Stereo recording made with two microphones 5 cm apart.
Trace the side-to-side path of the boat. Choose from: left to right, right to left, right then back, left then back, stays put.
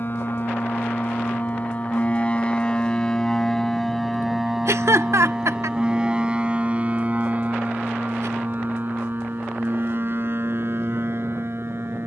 left to right.